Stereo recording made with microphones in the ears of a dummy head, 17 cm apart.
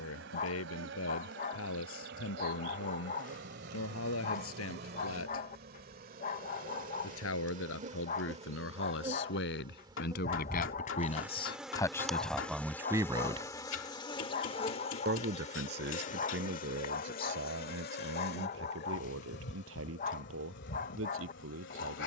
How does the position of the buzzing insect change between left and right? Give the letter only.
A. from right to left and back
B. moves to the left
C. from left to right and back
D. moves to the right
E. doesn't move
B.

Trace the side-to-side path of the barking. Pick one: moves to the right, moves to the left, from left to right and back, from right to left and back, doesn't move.
doesn't move.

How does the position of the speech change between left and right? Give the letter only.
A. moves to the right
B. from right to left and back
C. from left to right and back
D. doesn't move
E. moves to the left
A.